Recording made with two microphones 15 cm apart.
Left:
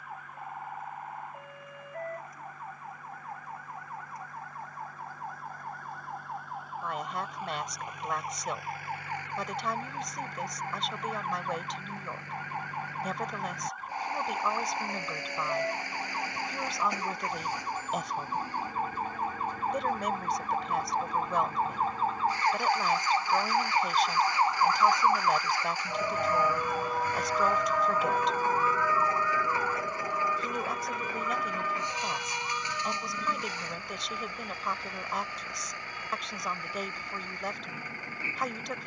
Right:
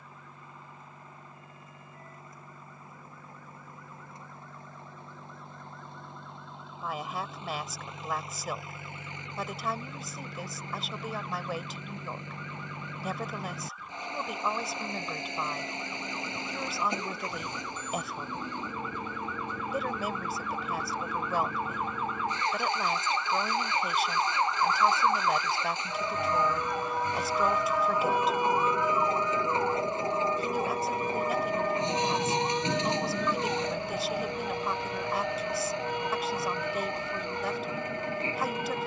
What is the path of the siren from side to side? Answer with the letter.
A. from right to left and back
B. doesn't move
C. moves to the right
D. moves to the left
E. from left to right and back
C.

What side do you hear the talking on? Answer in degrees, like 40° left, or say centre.
centre.